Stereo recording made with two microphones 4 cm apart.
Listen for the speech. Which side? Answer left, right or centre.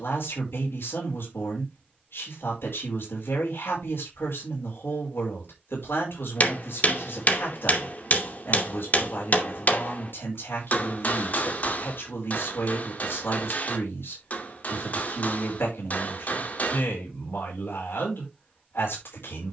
left.